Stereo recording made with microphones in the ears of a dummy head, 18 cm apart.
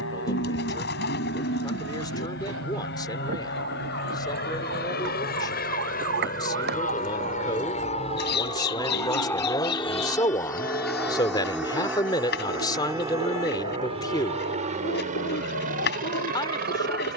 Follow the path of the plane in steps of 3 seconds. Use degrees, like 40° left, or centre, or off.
70° left, 60° left, 40° left, 10° left, 20° right, 40° right.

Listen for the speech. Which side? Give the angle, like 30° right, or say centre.
20° left.